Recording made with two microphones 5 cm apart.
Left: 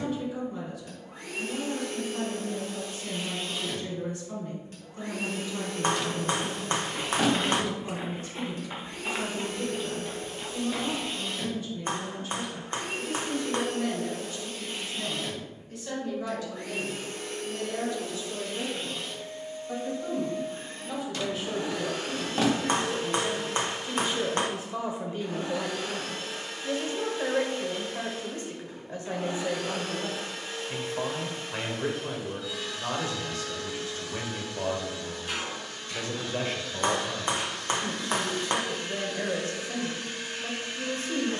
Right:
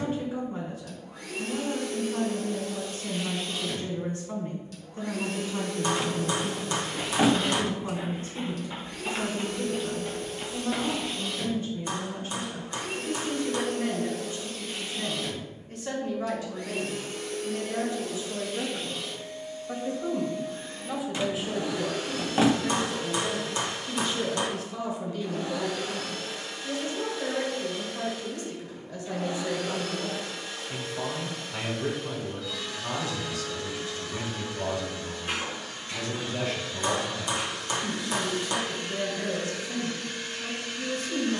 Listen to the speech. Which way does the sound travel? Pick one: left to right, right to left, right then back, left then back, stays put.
right to left.